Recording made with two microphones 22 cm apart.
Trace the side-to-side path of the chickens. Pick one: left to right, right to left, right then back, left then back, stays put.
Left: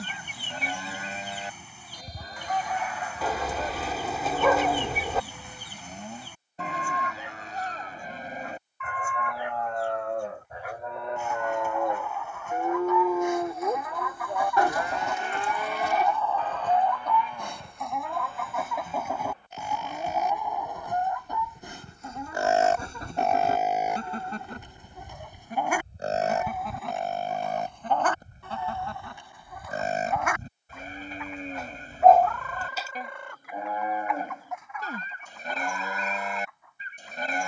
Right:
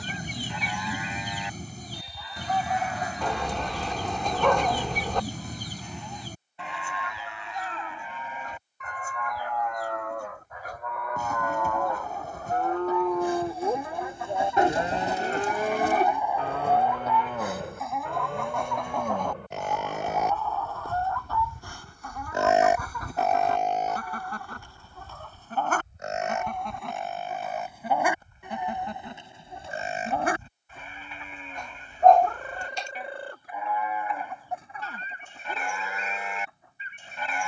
left then back.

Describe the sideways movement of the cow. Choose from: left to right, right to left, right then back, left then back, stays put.
right then back.